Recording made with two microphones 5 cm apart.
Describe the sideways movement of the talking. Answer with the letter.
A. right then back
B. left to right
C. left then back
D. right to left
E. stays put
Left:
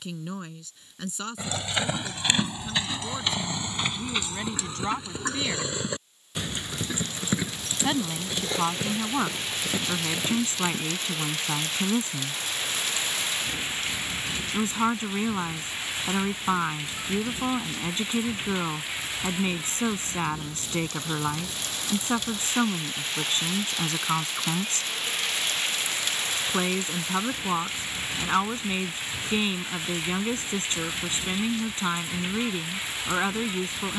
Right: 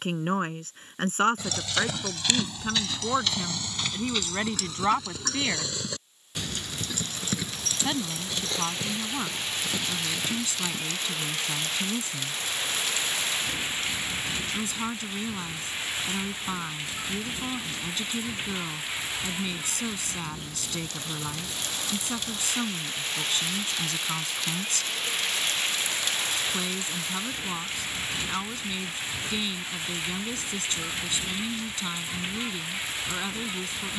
D.